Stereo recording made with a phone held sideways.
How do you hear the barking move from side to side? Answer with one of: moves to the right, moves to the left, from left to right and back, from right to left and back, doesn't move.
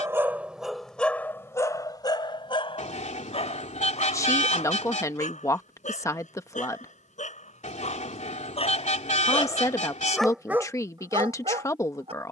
from right to left and back.